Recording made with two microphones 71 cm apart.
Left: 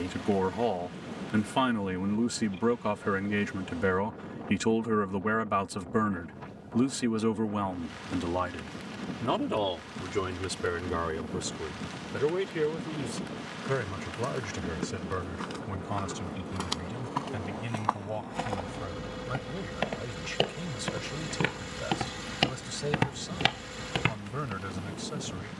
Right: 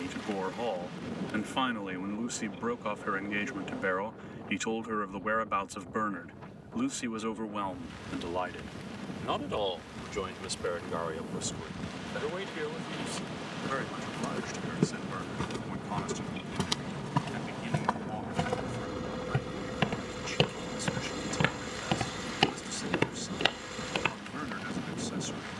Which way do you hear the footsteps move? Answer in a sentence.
In this clip you hear the footsteps go from the right side to the left.